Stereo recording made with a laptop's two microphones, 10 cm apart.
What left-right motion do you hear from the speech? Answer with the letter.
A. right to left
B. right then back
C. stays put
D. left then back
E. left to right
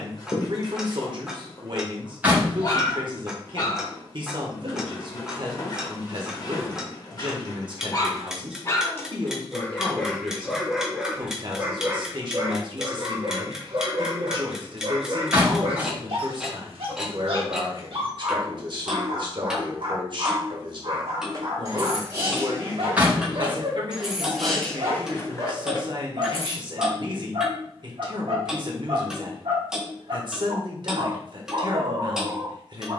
C.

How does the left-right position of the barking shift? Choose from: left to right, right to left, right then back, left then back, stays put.
left to right.